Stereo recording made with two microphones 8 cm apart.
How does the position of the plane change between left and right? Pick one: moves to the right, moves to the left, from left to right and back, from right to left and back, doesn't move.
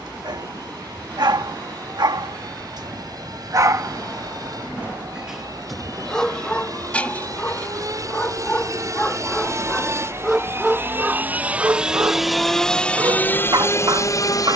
moves to the left.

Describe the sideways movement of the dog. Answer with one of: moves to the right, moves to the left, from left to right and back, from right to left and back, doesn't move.
from right to left and back.